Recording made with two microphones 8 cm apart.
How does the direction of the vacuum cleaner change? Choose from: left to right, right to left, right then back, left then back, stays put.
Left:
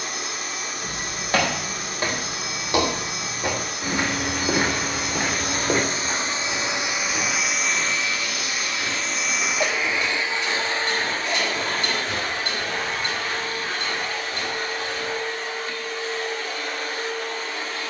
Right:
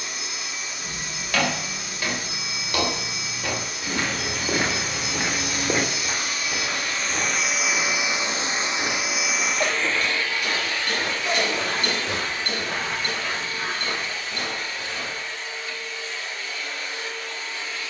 right then back.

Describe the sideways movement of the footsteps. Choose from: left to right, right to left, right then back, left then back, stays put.
left to right.